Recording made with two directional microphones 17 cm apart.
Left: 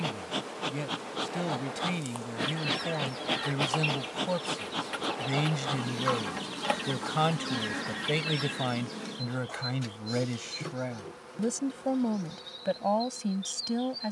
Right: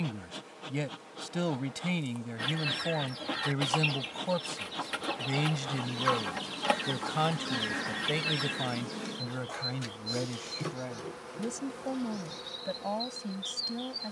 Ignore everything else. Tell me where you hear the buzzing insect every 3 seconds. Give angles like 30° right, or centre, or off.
50° left, 40° left, 10° left, 10° right, 20° right.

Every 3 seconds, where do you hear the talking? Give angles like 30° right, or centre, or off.
10° right, centre, 20° left, 30° left, 40° left.